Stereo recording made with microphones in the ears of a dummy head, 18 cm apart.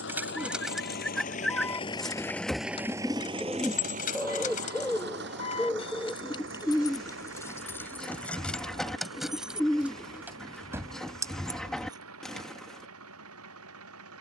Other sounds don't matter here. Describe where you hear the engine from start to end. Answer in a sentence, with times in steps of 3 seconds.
You can hear the engine on the left from 0 s and on the right from 3 s.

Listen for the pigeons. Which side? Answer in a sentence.
You can hear the pigeons in the centre.